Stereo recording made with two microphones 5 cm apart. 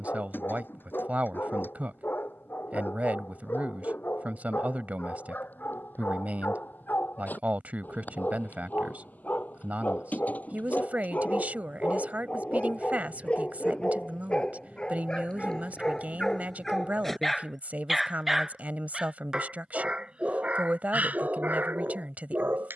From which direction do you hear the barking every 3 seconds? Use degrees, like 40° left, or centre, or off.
50° left, 50° left, 40° left, 40° left, 30° left, 10° left, 20° right, 40° right.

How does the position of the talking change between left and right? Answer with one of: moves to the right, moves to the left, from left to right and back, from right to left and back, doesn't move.
doesn't move.